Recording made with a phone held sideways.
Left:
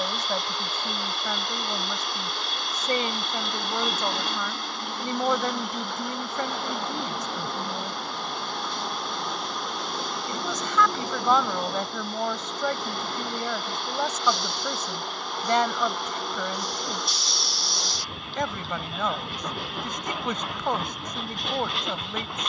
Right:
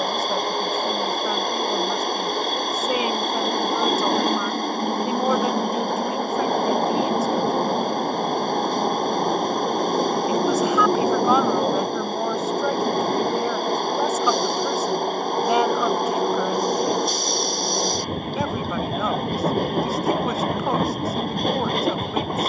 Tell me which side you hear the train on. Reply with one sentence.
In this clip you hear the train on the right.